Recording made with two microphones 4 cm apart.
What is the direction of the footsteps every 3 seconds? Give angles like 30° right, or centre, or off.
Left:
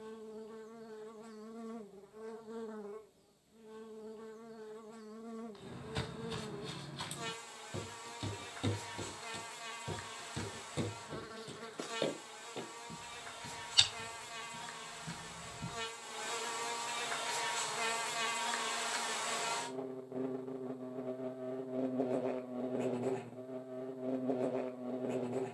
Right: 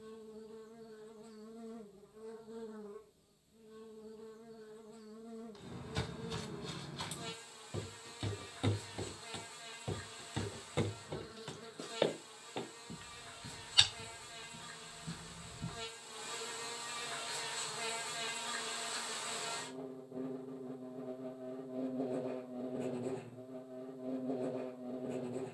off, 20° left, centre, 30° right, 10° right, 10° left, off, off, off.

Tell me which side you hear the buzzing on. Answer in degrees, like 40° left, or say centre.
60° left.